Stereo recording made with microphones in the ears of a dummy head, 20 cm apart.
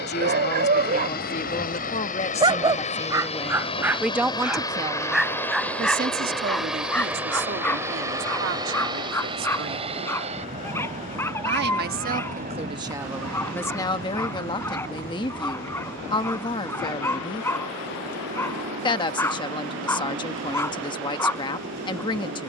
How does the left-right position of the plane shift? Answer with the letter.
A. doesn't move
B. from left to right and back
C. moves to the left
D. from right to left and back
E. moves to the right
E.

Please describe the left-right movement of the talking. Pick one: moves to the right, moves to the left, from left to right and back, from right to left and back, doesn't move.
from left to right and back.